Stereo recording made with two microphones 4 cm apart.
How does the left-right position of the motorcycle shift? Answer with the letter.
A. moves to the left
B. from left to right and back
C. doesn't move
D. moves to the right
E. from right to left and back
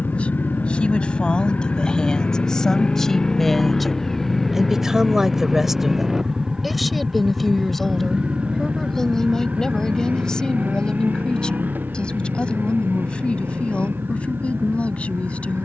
D.